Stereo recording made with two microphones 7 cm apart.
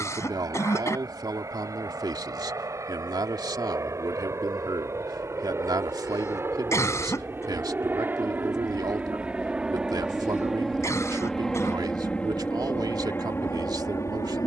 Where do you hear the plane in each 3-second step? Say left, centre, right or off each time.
right, right, right, centre, left.